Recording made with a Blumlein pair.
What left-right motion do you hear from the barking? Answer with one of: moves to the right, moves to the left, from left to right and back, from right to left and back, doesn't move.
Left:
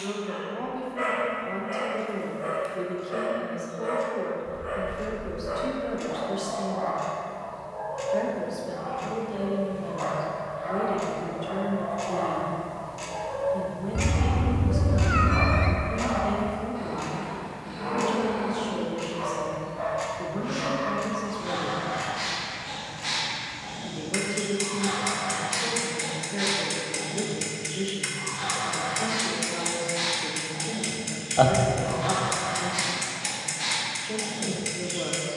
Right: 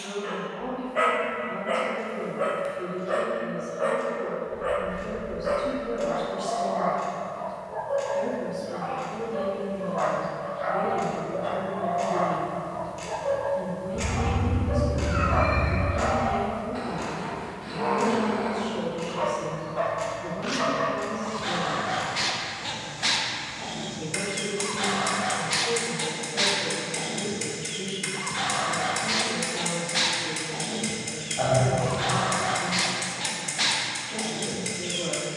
doesn't move.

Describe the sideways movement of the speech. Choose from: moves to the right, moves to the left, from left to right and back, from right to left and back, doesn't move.
doesn't move.